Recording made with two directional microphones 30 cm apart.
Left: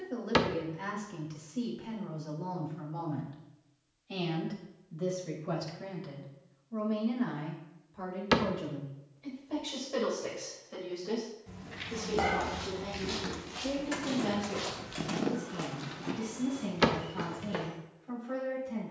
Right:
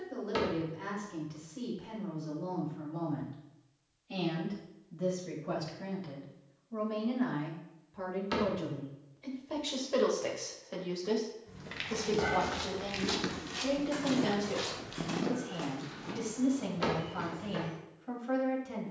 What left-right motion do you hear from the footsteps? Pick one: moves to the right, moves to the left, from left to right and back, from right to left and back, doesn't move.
moves to the left.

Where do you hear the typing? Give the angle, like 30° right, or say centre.
40° left.